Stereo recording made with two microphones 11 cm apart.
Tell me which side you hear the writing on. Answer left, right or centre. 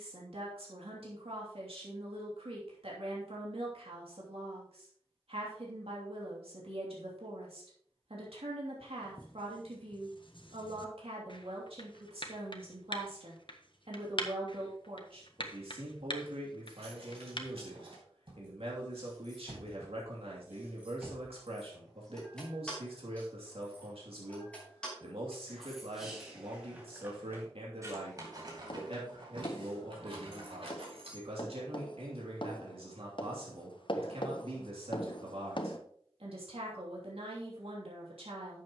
left.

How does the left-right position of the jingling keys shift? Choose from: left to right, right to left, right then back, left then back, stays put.
left then back.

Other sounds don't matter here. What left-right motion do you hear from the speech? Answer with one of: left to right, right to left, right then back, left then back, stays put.
stays put.